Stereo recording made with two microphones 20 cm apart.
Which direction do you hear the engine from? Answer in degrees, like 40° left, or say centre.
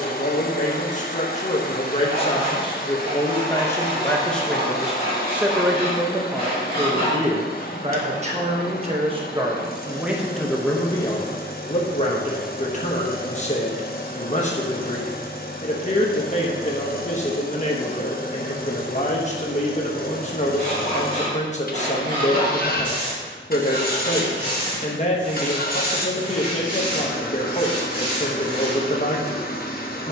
50° left.